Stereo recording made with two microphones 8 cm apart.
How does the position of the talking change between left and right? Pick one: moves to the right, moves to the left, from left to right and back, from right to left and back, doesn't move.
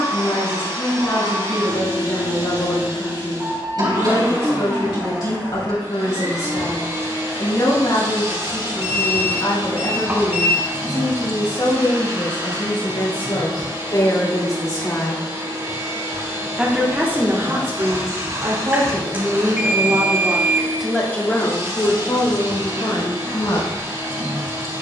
from left to right and back.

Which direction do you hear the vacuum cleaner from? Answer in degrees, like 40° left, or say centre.
50° right.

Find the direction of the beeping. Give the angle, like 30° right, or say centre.
20° right.